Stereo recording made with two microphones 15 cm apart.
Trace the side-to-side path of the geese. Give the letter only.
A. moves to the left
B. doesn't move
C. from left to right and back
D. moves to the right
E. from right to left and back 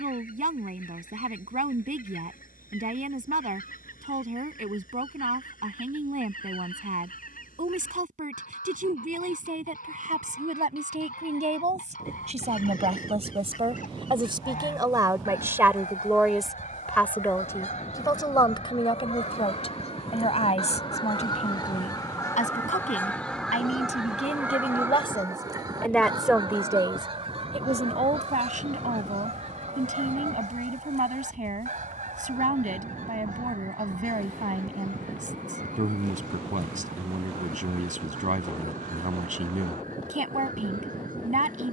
D.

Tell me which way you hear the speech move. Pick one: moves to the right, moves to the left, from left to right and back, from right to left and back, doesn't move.
from right to left and back.